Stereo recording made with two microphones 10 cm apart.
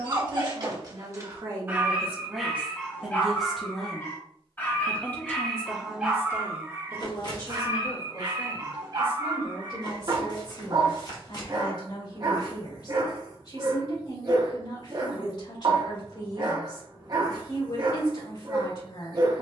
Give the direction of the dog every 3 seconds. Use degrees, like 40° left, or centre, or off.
20° right, 10° left, 30° right, 40° right, 40° right, 40° right, 40° right.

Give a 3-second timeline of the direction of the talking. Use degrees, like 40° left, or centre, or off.
30° right, 10° left, 40° left, 50° left, 50° left, 50° left, 50° left.